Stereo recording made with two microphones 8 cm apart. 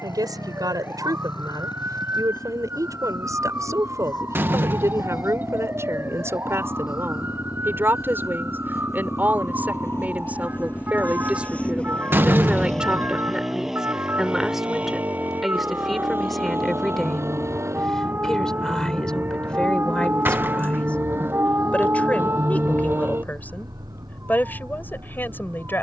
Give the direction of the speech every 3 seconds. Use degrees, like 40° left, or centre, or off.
50° right, 40° right, 30° right, 20° right, 10° right, centre, 10° left, 20° left, 20° left.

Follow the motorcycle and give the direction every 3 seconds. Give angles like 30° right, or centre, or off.
70° left, 60° left, 50° left, 30° left, centre, 30° right, 40° right, 60° right, 60° right.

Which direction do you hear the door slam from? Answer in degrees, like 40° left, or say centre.
30° right.